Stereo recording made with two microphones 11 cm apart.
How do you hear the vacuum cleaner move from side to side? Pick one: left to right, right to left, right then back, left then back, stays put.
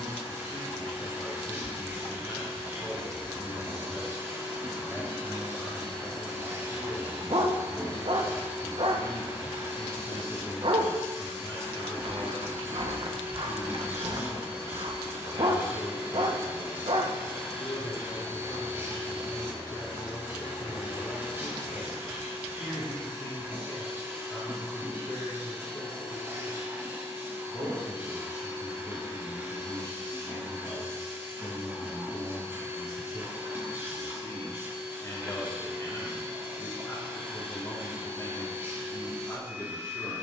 stays put.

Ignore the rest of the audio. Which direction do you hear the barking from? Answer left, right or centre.
right.